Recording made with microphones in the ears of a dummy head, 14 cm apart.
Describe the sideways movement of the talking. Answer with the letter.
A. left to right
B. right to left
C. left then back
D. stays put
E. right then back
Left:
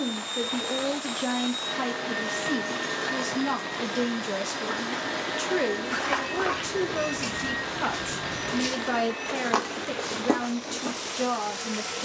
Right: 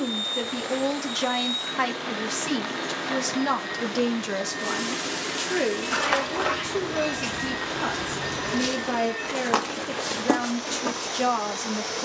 C.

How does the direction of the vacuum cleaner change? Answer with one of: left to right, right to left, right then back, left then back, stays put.
left to right.